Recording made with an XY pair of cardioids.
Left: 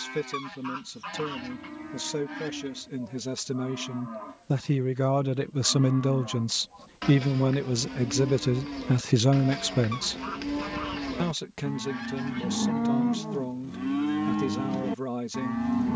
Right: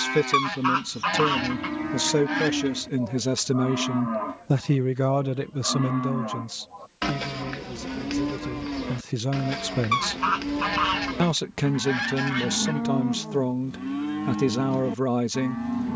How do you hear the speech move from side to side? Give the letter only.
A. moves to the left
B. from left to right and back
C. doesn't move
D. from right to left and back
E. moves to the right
D.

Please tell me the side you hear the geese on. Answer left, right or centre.
right.